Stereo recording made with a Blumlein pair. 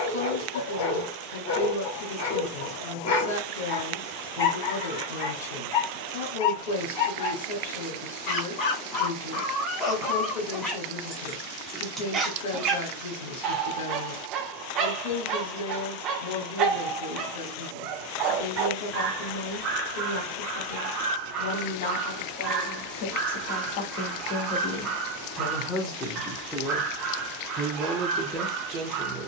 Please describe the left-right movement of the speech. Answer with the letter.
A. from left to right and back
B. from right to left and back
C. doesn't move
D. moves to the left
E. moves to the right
E.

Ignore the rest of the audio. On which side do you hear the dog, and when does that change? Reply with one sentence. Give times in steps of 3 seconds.
In this clip you hear the dog on the left from 0 s, in the centre from 9 s and on the right from 12 s.